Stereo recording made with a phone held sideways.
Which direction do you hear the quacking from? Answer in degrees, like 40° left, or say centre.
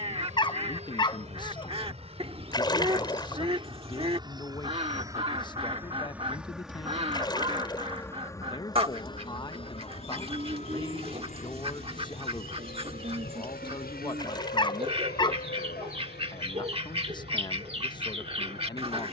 40° right.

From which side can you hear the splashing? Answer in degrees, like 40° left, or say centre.
30° left.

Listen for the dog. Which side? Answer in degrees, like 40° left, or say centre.
30° left.